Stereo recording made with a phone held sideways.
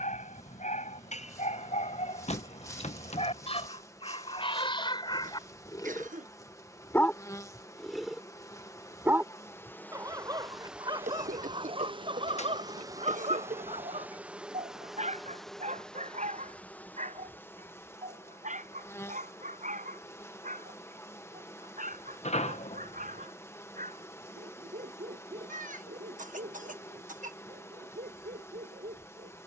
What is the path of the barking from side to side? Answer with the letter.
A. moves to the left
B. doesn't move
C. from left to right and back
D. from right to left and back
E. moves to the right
E.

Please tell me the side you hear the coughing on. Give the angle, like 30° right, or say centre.
70° right.